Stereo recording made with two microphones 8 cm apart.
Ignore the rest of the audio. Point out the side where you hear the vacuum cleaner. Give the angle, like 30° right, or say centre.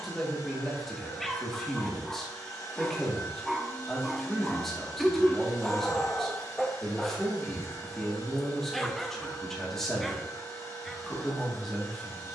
40° left.